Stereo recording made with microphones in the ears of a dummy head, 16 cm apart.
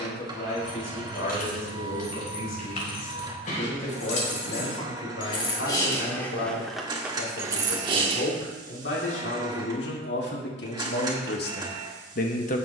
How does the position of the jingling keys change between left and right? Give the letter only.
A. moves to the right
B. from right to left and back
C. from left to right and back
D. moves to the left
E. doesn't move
A.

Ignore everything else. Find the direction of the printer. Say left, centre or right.
right.